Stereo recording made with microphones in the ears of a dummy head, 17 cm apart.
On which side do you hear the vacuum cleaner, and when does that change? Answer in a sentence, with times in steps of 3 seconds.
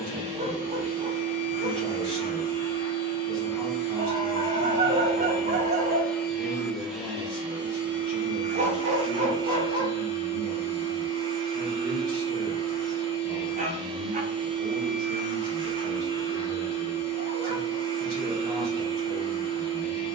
In this clip you hear the vacuum cleaner on the left from 0 s, in the centre from 6 s and on the right from 9 s.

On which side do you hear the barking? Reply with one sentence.
In this clip you hear the barking on the right.